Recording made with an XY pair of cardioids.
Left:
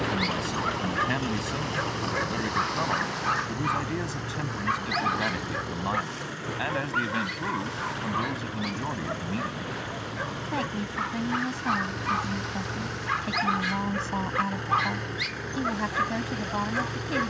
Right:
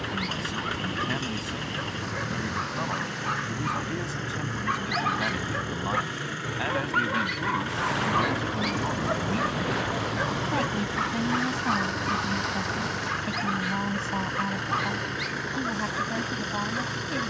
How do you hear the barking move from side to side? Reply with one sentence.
In this clip you hear the barking move from left to right and back again.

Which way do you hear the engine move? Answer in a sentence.
You can hear the engine stay put.